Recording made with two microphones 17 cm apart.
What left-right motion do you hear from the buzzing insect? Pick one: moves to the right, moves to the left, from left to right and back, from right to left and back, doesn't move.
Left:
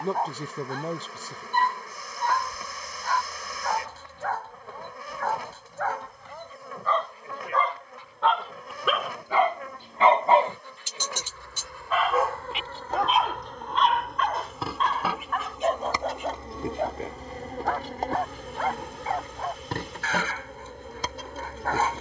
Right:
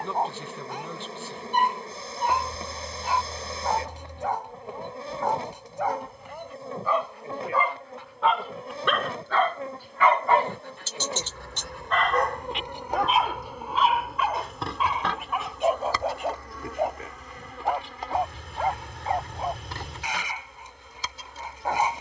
moves to the left.